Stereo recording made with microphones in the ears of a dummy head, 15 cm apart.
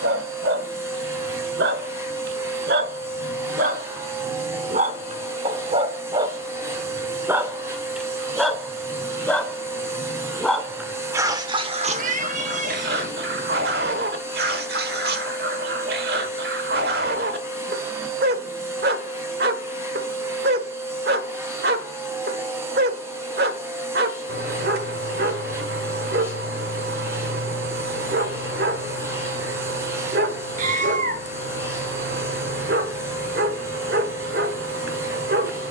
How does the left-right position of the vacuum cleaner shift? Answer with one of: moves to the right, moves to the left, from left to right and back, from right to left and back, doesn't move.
doesn't move.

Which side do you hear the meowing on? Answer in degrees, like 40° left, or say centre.
50° right.